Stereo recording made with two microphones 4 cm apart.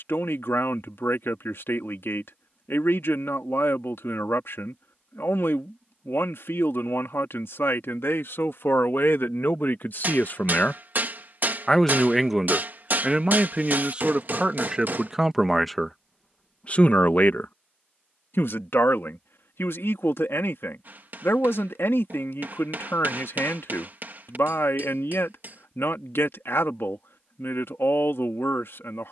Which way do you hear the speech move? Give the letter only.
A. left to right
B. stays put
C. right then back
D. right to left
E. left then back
C.